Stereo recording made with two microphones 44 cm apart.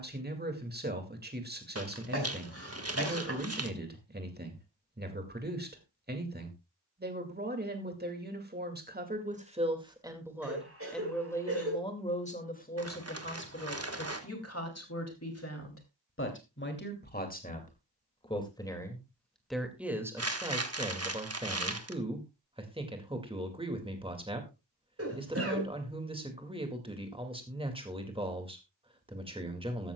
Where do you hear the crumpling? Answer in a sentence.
In this clip you hear the crumpling on the right.